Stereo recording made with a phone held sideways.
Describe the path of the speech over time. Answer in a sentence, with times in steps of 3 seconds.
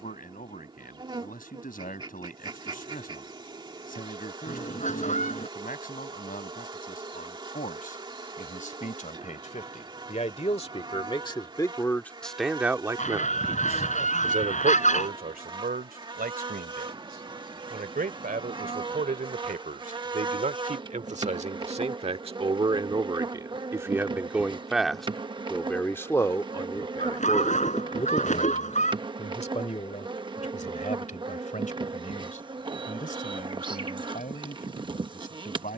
You can hear the speech on the left from 0 s, on the right from 12 s, in the centre from 24 s and on the left from 27 s.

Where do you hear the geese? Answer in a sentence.
You can hear the geese on the left.